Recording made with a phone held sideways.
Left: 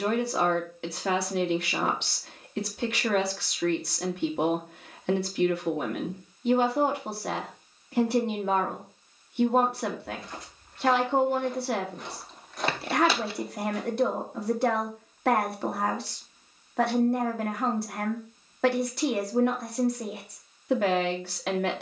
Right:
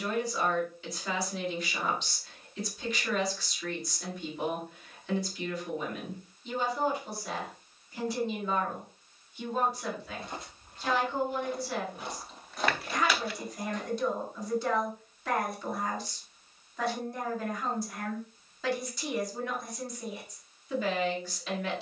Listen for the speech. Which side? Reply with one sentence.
In this clip you hear the speech on the left.